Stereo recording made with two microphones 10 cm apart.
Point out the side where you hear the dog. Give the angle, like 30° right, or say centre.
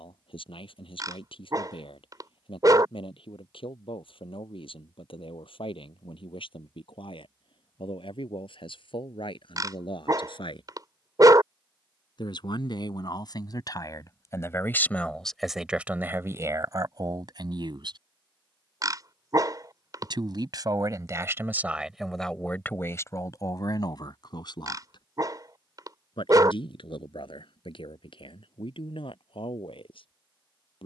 40° right.